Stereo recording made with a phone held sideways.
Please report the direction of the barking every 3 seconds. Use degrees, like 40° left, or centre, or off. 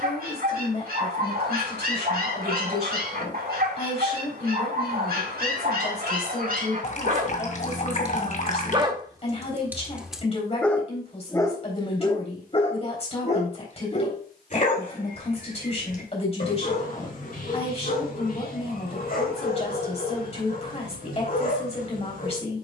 70° right, 70° right, 50° right, centre, 40° left, 60° left, 60° left, 60° left.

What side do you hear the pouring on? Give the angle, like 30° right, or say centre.
50° left.